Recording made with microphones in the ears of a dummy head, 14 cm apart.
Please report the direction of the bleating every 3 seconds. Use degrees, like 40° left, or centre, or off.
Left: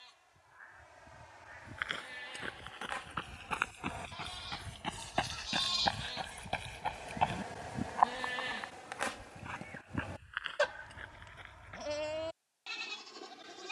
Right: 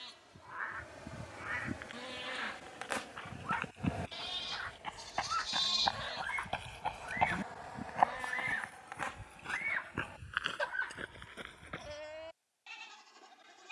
60° right, 30° right, 20° left, 50° left, 60° left.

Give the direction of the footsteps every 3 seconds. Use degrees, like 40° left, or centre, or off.
70° left, 50° left, 10° right, 50° right, off.